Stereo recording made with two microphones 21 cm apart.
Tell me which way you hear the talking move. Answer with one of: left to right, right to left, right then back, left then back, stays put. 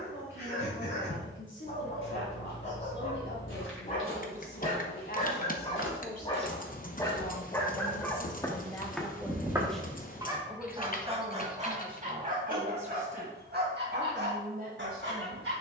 left to right.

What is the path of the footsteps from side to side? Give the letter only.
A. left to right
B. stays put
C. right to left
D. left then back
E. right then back
A.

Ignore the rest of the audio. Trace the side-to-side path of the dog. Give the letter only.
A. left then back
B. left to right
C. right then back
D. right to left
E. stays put
B.